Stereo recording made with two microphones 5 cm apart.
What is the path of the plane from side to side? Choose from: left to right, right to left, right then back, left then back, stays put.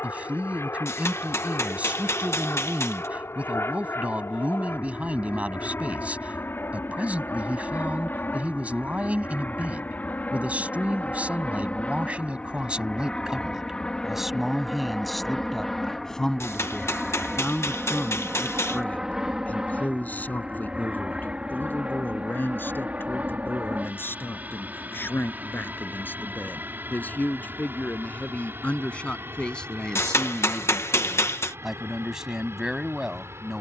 left to right.